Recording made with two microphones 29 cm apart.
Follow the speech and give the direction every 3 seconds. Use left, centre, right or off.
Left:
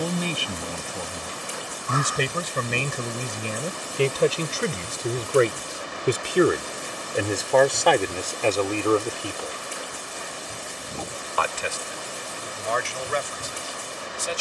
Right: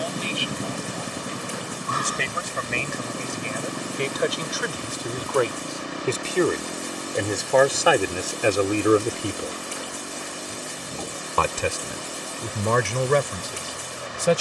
left, left, centre, right, right.